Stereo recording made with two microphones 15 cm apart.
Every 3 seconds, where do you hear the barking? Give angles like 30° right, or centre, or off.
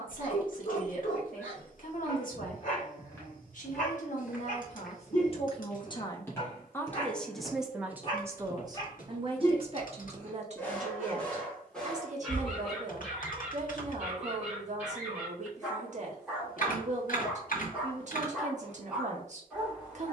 60° left, 50° left, 40° left, 10° left, centre, 10° right, 10° right.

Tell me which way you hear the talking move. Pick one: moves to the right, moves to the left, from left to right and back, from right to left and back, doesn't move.
moves to the right.